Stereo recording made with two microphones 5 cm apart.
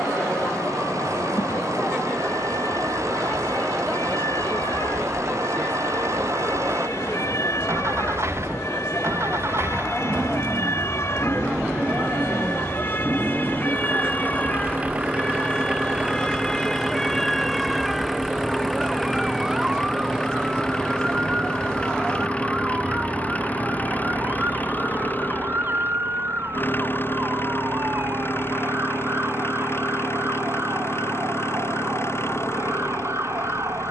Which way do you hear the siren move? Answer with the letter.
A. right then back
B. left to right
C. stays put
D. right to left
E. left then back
B.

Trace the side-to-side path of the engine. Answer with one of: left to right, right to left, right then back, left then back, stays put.
right to left.